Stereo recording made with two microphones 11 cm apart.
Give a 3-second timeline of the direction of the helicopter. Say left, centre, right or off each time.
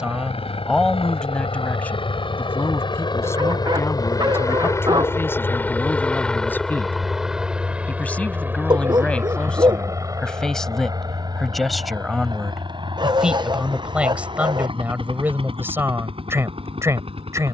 left, left, centre, right, right, right.